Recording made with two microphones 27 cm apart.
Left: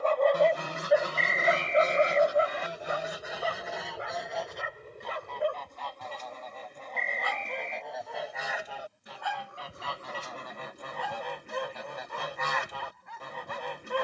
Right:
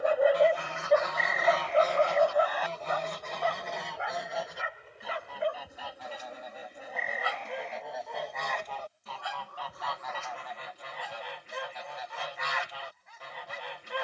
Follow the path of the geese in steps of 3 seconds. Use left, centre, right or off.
left, centre, centre, left, left.